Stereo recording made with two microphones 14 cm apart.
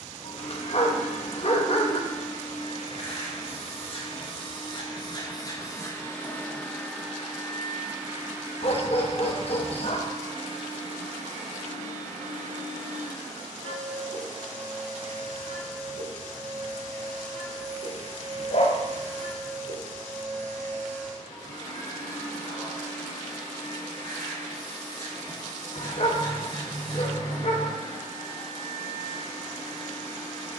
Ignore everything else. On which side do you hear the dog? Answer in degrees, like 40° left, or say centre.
50° left.